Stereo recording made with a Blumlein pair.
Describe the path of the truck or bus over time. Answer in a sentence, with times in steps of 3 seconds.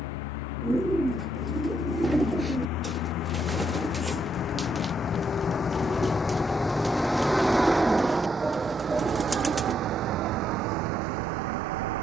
In this clip you hear the truck or bus on the left from 0 s, in the centre from 6 s and on the right from 9 s.